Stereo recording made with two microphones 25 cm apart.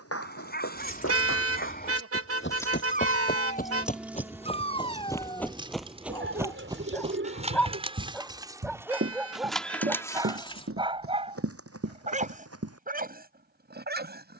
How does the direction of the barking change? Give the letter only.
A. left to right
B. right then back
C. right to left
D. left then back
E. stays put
A.